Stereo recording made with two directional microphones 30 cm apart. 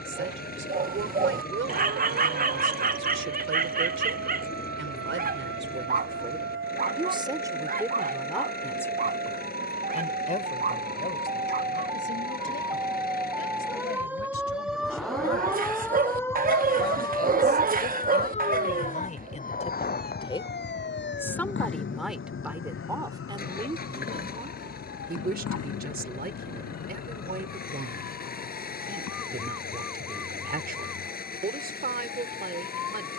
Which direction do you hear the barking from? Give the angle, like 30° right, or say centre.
30° right.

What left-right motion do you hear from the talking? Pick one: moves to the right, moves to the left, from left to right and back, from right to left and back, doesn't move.
from right to left and back.